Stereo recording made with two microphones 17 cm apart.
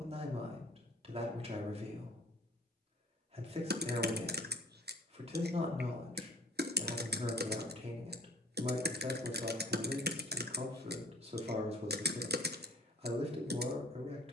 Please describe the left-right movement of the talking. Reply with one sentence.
You can hear the talking stay in one place.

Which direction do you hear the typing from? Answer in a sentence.
You can hear the typing on the right.